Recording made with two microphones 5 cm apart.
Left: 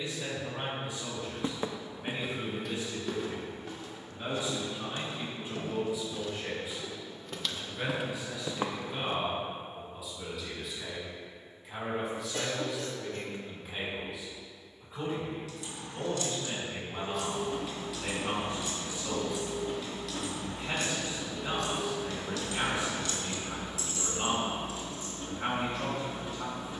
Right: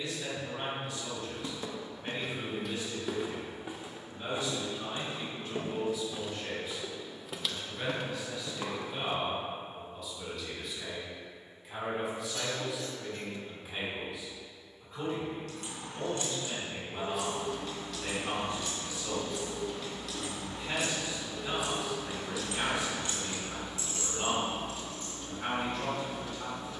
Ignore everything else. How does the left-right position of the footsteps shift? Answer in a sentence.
You can hear the footsteps move from left to right and back again.